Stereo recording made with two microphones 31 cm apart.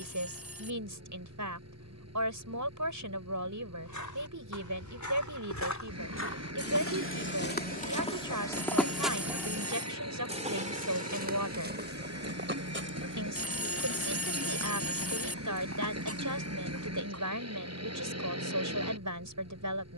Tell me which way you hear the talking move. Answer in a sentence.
You can hear the talking stay in one place.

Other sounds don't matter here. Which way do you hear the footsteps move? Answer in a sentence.
In this clip you hear the footsteps go from the left side to the right.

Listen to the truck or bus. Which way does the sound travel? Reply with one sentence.
You can hear the truck or bus stay put.